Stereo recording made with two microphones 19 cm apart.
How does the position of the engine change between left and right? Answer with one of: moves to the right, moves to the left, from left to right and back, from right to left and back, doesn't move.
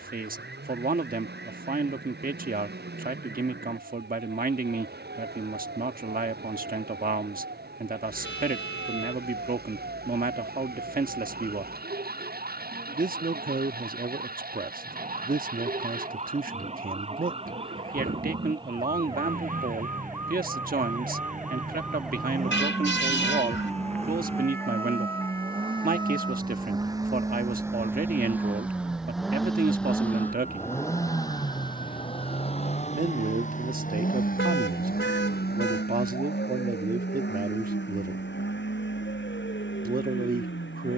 moves to the left.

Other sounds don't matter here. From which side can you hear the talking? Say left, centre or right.
right.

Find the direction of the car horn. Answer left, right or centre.
left.